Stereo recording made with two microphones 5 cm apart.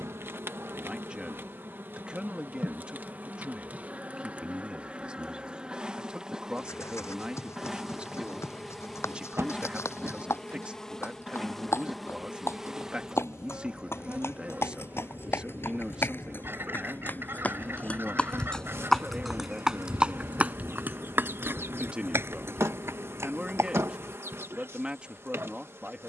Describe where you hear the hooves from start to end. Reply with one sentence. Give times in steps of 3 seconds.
You can hear the hooves not at all from 0 s, on the left from 6 s, in the centre from 18 s, on the right from 21 s and not at all from 24 s.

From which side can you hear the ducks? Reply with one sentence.
In this clip you hear the ducks on the right.